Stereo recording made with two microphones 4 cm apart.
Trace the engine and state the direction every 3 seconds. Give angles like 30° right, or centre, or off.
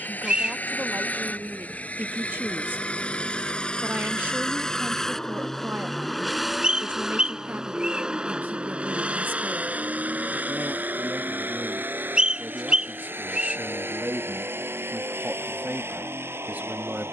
40° left, 20° left, 10° right, 40° right, 60° right, 70° right.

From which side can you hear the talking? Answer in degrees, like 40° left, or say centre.
50° right.